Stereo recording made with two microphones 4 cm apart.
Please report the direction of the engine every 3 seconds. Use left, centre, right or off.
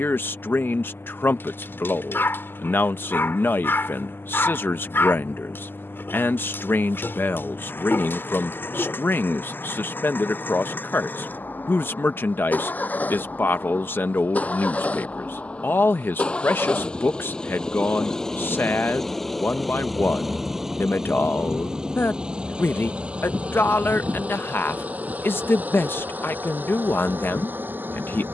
left, left, left, left, left, left, centre, right, right, right.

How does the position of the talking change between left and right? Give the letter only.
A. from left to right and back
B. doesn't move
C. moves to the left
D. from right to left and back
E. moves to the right
B.